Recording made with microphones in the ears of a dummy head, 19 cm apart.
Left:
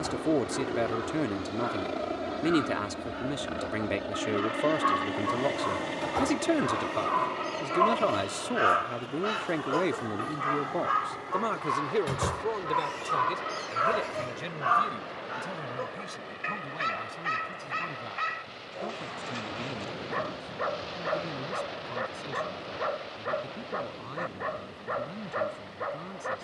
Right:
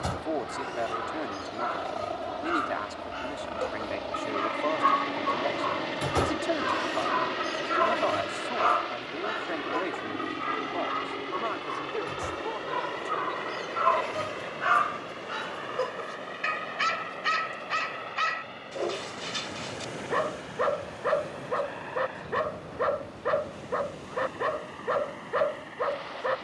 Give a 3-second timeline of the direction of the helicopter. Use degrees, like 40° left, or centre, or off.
40° left, 10° left, 20° right, 40° right, 50° right, 60° right, 60° right, 70° right, 70° right.